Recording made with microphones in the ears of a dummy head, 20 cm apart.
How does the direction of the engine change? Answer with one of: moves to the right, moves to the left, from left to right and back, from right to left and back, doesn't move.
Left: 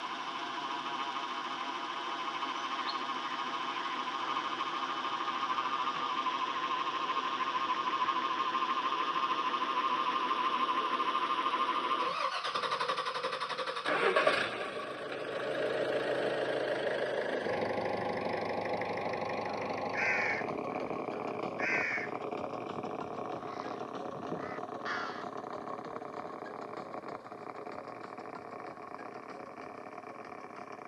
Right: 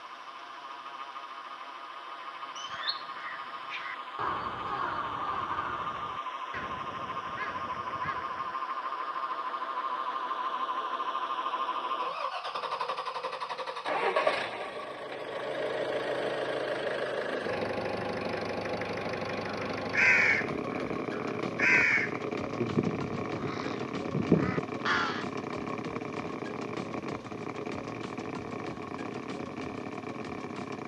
moves to the right.